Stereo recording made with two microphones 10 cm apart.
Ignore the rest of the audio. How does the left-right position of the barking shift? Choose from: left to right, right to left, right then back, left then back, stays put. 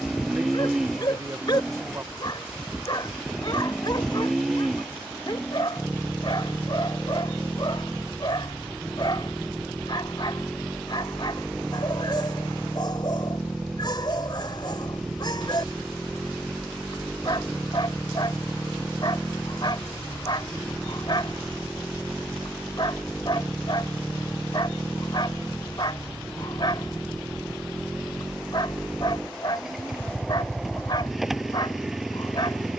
stays put.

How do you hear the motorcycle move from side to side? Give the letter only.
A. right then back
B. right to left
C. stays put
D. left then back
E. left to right
C.